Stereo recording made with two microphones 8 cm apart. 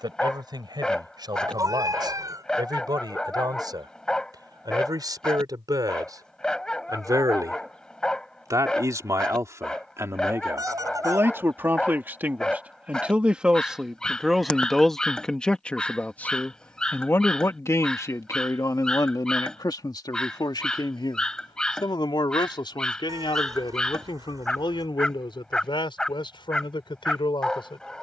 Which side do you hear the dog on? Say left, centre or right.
centre.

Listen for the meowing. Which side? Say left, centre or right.
right.